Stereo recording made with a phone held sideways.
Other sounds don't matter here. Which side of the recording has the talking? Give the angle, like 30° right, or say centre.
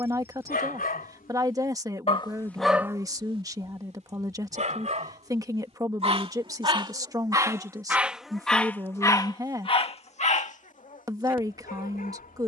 20° right.